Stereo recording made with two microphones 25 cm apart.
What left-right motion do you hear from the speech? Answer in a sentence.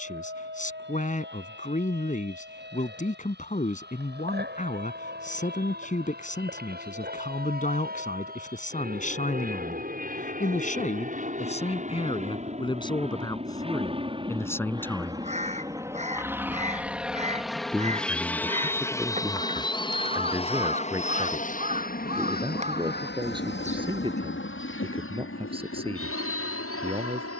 You can hear the speech travel towards the right.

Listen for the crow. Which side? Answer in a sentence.
You can hear the crow on the right.